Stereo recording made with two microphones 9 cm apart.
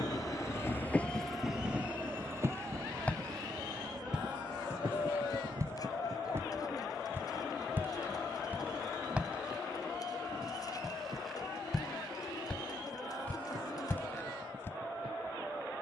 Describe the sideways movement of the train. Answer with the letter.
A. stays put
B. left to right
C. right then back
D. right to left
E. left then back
B.